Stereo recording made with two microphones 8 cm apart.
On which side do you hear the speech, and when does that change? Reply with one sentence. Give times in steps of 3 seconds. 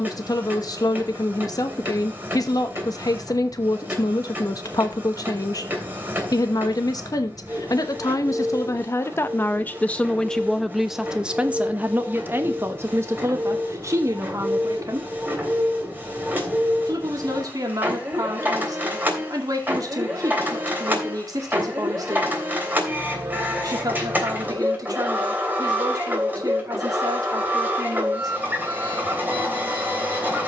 In this clip you hear the speech on the left from 0 s, in the centre from 9 s and on the right from 12 s.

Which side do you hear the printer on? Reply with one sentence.
You can hear the printer on the right.